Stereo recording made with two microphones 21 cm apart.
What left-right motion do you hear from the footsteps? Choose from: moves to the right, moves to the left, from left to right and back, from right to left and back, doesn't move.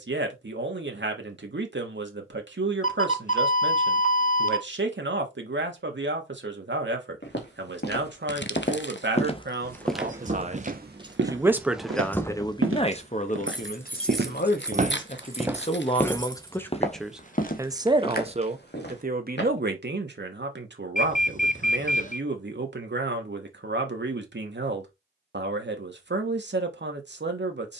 from left to right and back.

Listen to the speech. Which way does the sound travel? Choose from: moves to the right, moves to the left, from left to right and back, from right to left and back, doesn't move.
from right to left and back.